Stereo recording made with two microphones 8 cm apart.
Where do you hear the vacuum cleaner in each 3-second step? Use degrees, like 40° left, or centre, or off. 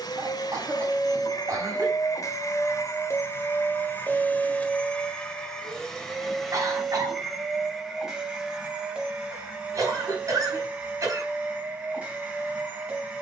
60° left, 20° left, centre, 20° right, 20° right.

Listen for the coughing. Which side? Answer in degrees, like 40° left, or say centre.
50° right.